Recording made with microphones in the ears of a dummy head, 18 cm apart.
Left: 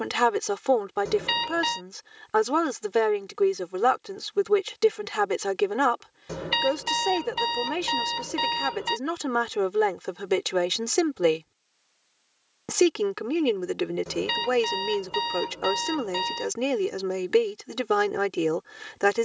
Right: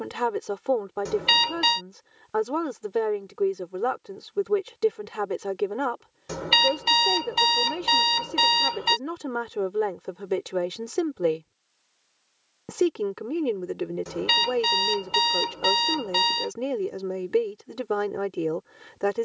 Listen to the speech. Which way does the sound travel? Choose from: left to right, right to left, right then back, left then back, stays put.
stays put.